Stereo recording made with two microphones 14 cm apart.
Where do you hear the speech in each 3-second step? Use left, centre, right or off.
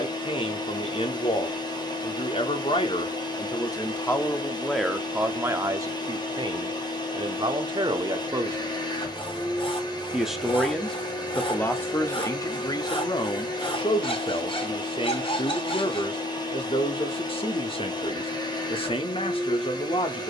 left, centre, right, centre, left, left, left.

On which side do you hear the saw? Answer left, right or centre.
left.